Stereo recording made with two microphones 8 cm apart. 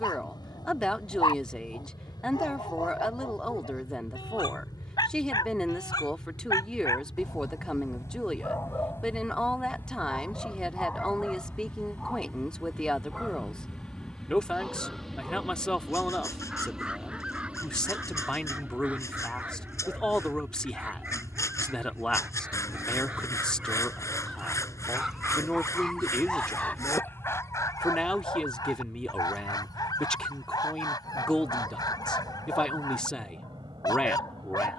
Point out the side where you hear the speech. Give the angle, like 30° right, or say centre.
10° left.